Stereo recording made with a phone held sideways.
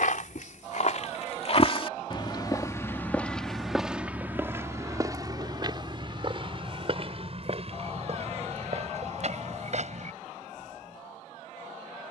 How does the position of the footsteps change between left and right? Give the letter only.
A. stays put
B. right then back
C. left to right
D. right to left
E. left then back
C.